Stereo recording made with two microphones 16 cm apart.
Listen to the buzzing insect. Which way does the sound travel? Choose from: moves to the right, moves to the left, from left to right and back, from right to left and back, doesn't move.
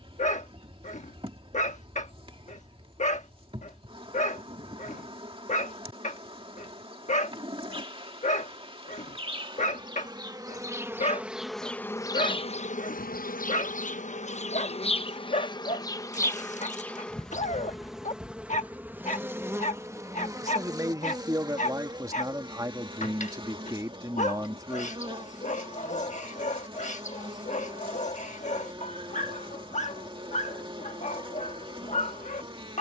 from right to left and back.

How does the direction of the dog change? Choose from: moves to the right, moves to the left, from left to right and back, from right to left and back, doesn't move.
doesn't move.